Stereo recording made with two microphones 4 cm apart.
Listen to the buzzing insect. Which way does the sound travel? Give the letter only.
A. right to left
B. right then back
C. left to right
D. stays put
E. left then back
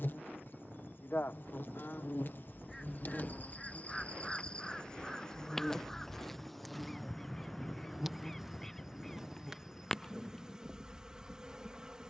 C.